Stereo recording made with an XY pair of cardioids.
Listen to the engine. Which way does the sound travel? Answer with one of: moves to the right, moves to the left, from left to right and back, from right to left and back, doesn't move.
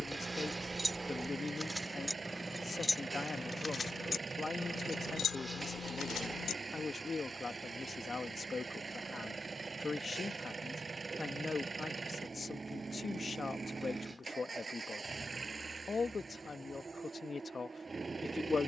doesn't move.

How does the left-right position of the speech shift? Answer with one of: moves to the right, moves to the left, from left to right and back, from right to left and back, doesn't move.
doesn't move.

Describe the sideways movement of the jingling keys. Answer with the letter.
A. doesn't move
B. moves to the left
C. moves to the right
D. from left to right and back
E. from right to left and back
B.